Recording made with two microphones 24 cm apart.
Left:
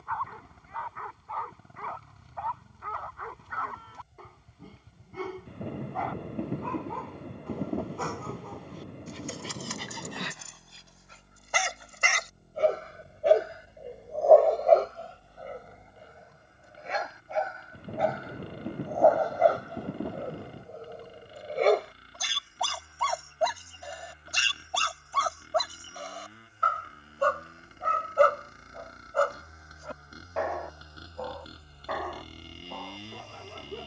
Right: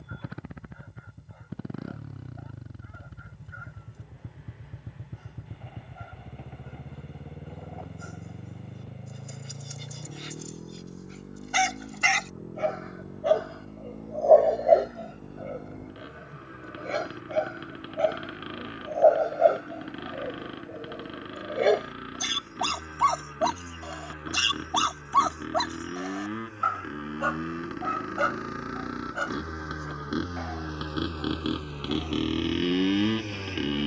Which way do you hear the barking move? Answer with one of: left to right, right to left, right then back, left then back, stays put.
right then back.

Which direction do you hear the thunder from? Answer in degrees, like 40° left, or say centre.
60° left.